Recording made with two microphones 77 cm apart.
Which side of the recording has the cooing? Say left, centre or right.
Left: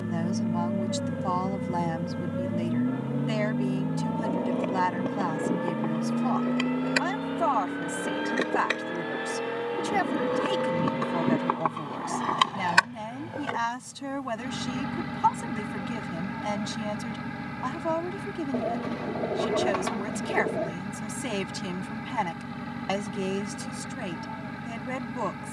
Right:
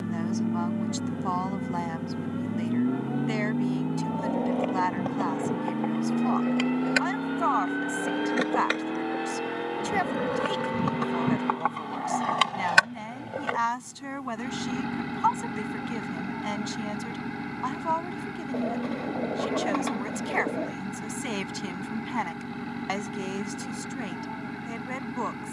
left.